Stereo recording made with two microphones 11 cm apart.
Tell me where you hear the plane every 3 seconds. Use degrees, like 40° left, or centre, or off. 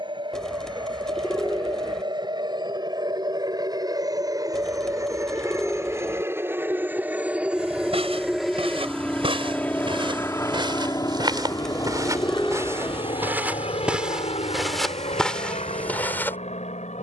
50° right, 30° right, 10° right, 20° left, 50° left, 70° left.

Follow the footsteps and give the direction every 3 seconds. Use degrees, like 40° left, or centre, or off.
off, off, 60° right, 50° right, 20° right, 10° left.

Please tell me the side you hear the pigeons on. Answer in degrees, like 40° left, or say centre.
10° left.